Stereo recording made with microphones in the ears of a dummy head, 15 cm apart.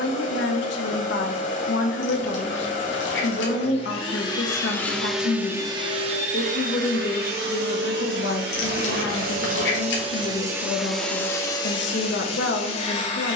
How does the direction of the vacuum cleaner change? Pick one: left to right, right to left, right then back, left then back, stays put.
right then back.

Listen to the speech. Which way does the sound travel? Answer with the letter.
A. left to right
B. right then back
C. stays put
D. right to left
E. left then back
C.